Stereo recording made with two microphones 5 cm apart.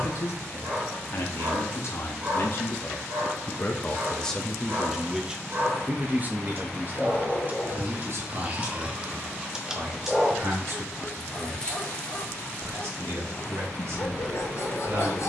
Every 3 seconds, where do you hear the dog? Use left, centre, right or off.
right, right, right, centre, left.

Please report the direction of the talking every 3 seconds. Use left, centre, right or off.
left, centre, right, right, right.